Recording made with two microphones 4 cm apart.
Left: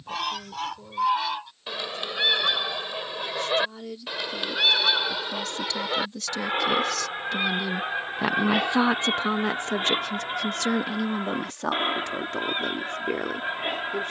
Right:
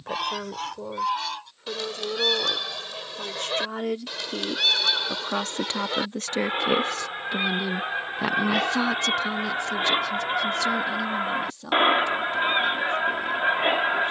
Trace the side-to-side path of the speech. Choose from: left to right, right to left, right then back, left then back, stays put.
right to left.